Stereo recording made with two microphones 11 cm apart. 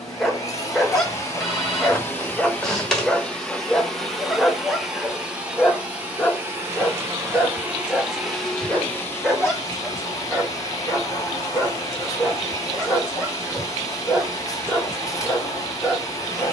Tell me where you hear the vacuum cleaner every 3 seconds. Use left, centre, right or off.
left, centre, centre, left, left, left.